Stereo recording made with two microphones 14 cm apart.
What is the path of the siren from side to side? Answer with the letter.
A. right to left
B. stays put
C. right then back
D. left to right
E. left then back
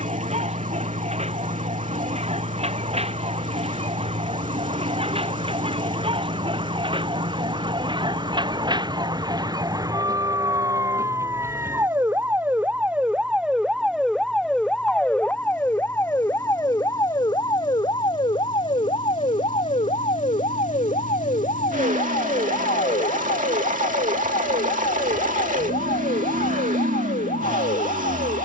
A.